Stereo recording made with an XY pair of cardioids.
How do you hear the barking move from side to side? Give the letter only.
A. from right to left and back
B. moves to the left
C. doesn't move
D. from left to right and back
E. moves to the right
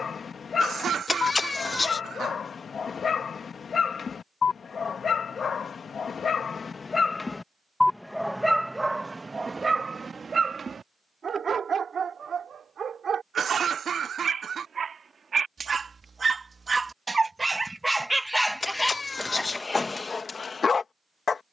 D.